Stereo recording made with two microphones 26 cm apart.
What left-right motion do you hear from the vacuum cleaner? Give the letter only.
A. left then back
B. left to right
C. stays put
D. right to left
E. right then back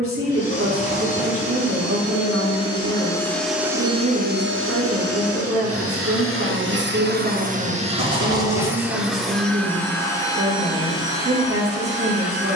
E.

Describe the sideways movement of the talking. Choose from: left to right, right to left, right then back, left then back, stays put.
stays put.